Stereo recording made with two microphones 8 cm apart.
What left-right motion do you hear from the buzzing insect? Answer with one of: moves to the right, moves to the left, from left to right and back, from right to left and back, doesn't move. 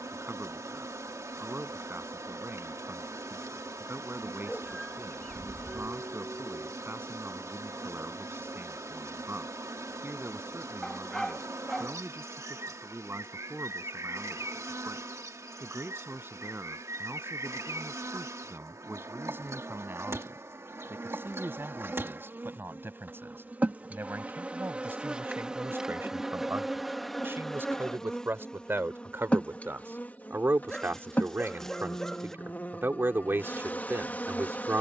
moves to the left.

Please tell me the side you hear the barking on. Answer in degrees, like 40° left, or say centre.
10° left.